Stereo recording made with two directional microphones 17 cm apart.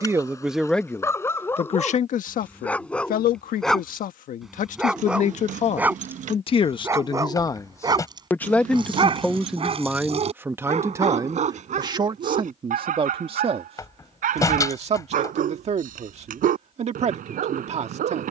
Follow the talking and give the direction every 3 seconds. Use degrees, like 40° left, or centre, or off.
30° left, 50° left, 20° left, 10° right, 30° right, 40° right.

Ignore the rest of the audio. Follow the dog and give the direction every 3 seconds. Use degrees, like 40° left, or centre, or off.
10° left, centre, 20° right, 40° right, 50° right, 60° right.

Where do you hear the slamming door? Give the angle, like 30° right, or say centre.
20° left.